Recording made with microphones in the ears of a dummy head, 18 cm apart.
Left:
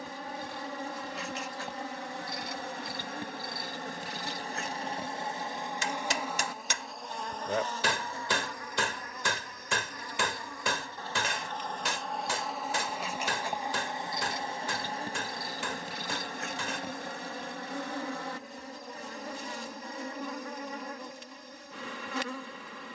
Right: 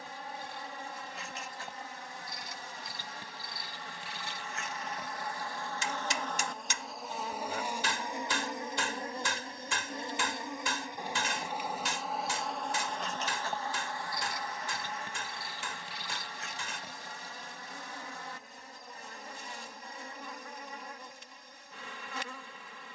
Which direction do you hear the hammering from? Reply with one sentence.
You can hear the hammering on the left.